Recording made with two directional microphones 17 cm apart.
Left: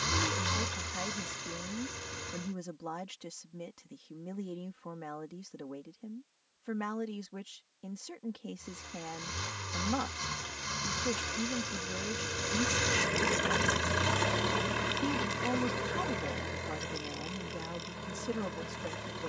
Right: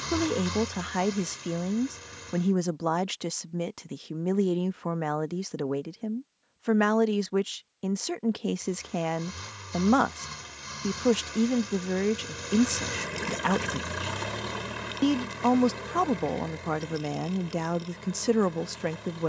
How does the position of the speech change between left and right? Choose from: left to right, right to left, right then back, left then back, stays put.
stays put.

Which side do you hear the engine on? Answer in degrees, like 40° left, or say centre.
10° left.